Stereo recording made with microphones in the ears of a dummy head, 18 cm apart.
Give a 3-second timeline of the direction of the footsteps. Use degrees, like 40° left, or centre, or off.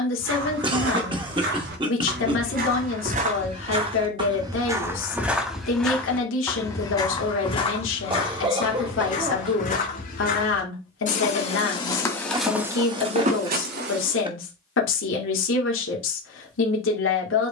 60° right, 20° right, 30° left, 40° left, 30° right, off.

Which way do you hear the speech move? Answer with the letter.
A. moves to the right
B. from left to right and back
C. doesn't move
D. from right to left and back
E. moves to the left
C.